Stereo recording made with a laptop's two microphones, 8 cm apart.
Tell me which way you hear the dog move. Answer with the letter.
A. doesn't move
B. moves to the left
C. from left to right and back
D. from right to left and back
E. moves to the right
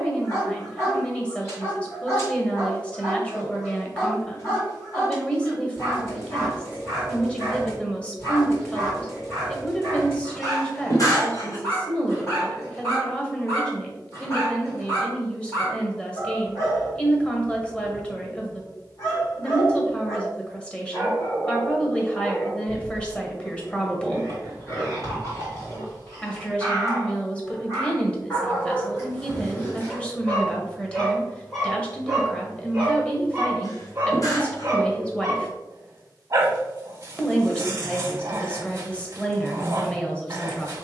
E.